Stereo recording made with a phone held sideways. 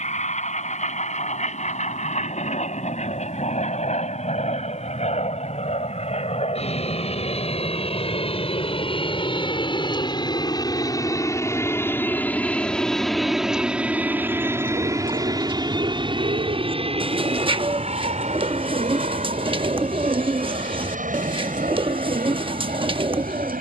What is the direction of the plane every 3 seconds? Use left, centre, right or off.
left, left, left, left, centre, right, right, right.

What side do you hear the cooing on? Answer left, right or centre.
right.